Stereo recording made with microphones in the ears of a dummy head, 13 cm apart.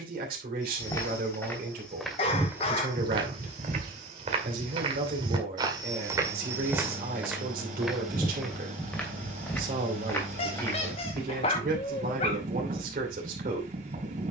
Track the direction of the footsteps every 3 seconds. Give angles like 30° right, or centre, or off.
centre, 40° right, 10° right, 20° left, off.